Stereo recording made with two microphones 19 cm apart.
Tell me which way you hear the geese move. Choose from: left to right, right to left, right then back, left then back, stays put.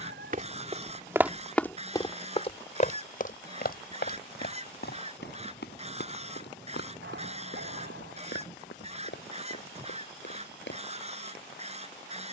stays put.